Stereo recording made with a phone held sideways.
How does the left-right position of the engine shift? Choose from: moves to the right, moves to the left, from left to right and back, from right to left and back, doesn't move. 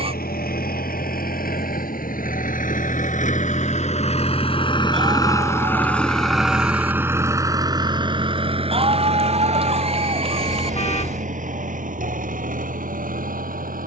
moves to the right.